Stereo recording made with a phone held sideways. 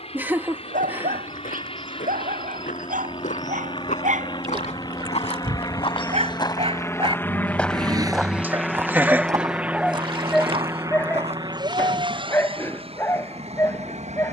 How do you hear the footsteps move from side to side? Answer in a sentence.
In this clip you hear the footsteps travel towards the right.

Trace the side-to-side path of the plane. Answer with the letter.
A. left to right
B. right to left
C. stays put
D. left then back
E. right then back
A.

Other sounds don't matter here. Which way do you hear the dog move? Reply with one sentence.
In this clip you hear the dog move to the left.